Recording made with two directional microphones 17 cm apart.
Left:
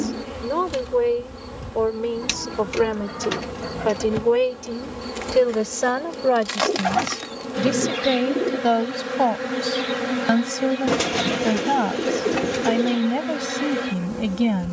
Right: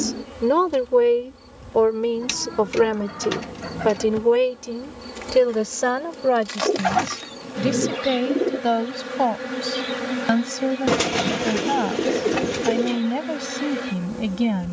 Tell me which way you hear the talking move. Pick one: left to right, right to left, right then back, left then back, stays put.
right to left.